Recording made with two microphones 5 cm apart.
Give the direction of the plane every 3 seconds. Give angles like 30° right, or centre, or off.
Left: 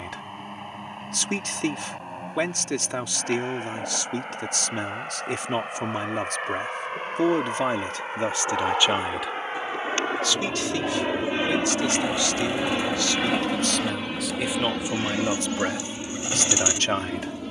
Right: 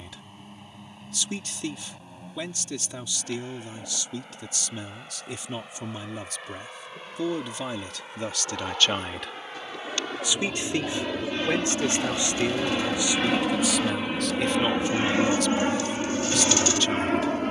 70° left, 60° left, 50° left, 30° left, centre, 40° right.